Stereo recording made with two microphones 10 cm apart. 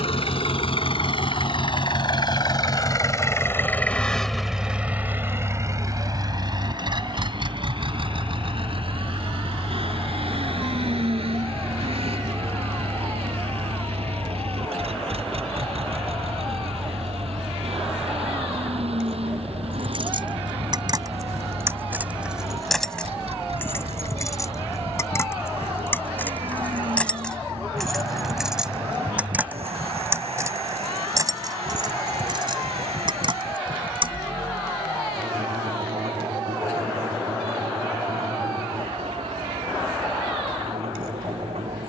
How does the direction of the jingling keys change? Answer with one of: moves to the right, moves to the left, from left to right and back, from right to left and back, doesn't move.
from right to left and back.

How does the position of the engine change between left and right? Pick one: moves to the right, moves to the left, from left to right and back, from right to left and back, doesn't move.
moves to the right.